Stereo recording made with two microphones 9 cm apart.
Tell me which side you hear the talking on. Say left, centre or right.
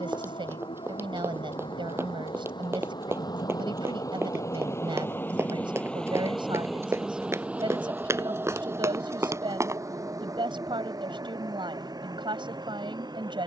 right.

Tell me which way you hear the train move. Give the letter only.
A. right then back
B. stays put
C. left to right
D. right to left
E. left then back
C.